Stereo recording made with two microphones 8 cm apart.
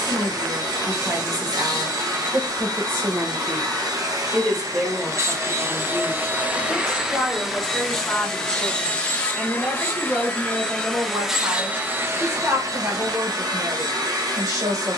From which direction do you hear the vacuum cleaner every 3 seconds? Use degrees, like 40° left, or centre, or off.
60° right, 50° right, centre, 10° left, 50° right.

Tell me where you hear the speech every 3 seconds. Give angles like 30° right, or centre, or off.
50° right, 10° right, 10° left, 20° right, 40° right.